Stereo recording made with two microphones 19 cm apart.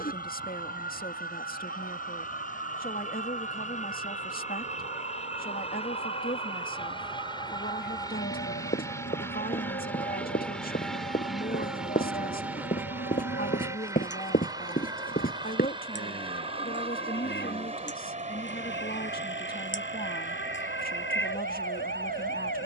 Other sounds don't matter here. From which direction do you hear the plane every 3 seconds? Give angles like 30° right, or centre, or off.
50° left, 40° left, 20° left, 10° left, 10° right, 30° right, 40° right, 40° right.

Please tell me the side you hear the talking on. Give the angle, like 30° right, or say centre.
50° left.